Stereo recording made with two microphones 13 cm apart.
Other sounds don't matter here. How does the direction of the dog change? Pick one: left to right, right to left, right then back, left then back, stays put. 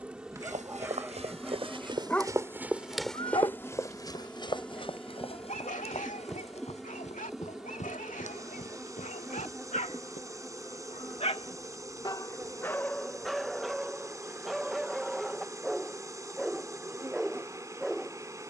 left then back.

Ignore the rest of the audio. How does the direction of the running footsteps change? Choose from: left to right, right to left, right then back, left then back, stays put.
right to left.